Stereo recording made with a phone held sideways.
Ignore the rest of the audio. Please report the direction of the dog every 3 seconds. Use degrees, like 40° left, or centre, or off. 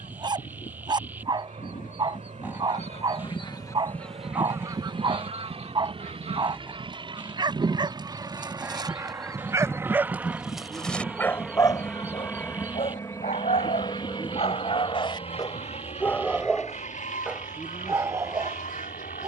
30° right, 30° right, 30° right, centre, 50° left, 10° left, 20° right.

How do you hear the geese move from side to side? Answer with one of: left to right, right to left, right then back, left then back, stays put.
right then back.